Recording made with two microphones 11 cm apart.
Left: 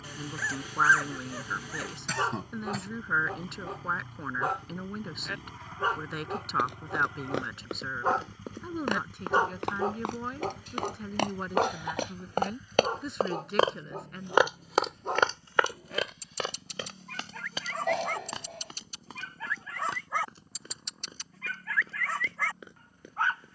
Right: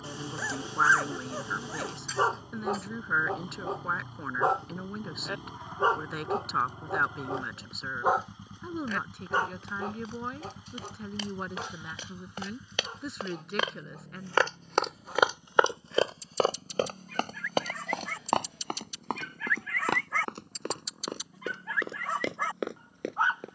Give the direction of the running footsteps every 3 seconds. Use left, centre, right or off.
off, off, left, left, left, right, right, right.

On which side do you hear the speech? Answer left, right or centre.
centre.